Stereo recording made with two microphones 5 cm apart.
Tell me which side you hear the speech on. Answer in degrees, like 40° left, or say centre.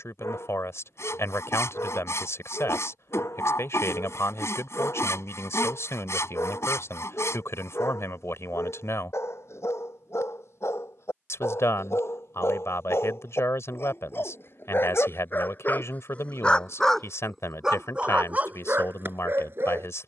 80° left.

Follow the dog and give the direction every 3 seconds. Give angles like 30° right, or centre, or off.
80° left, 80° left, 80° left, 70° left, 60° left, 20° left, 40° right.